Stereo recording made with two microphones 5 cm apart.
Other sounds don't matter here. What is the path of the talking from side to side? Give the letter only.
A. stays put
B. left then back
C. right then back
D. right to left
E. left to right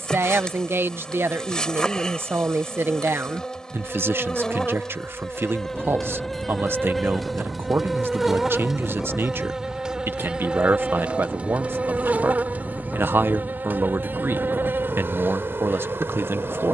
A.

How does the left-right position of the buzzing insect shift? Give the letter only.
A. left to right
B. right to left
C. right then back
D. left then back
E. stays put
A.